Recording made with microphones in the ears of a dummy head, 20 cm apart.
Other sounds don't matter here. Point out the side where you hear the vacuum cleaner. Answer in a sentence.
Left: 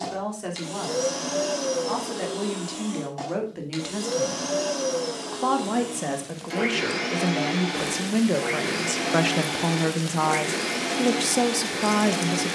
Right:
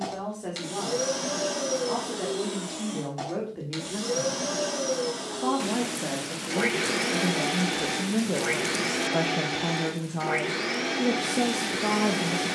In this clip you hear the vacuum cleaner in the centre.